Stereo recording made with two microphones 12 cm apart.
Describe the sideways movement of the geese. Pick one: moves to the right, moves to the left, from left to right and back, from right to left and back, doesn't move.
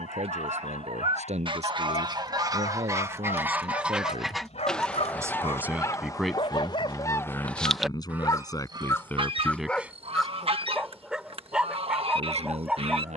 from right to left and back.